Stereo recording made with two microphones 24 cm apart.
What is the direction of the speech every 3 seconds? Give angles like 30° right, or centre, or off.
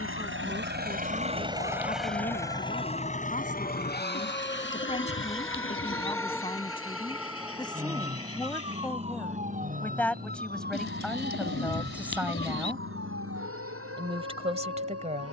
30° left, 30° left, 20° left, centre, 20° right.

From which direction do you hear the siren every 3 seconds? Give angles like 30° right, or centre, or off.
40° left, 20° left, 10° right, 40° right, 60° right.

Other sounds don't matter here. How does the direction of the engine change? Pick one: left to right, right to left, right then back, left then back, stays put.
right to left.